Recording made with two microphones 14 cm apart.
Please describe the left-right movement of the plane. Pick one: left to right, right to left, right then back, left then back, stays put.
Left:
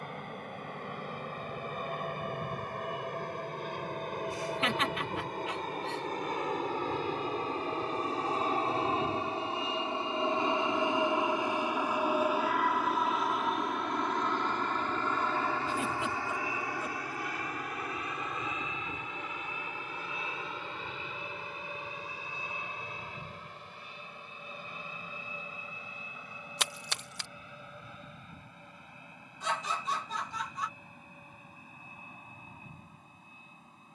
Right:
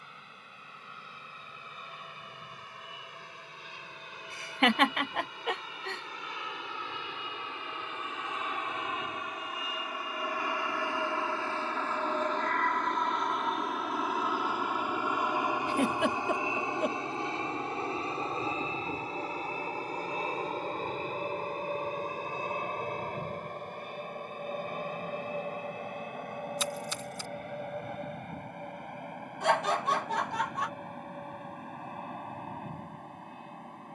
left to right.